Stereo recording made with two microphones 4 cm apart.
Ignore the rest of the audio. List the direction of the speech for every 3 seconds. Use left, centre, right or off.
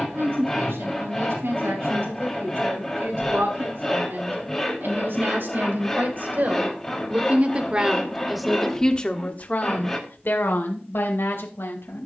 right, right, right, left.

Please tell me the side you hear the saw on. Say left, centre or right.
centre.